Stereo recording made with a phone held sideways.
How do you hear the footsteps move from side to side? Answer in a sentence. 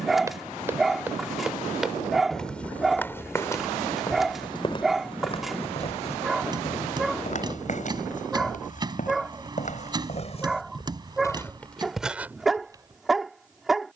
You can hear the footsteps go left and come back.